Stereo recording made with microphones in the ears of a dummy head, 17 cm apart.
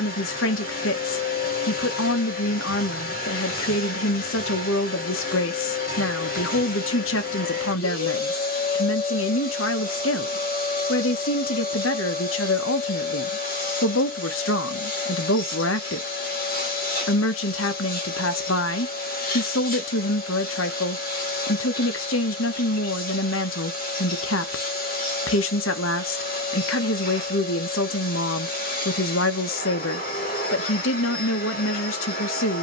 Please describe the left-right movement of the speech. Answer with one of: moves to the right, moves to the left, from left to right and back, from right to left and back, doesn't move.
doesn't move.